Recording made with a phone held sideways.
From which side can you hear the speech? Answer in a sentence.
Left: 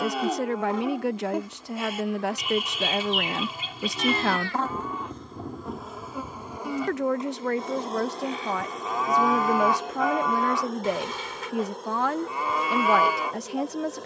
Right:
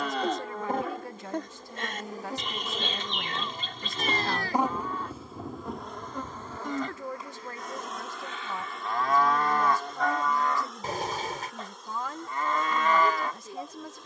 In this clip you hear the speech on the left.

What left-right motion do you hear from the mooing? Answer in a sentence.
In this clip you hear the mooing stay in one place.